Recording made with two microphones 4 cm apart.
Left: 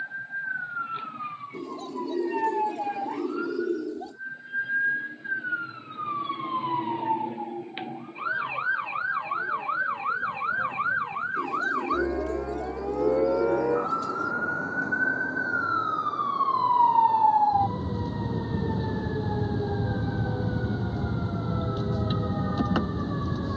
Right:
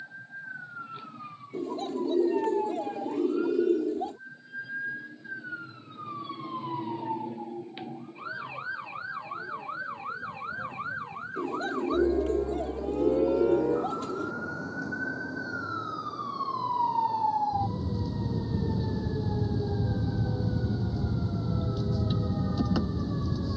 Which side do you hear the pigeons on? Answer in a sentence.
You can hear the pigeons on the right.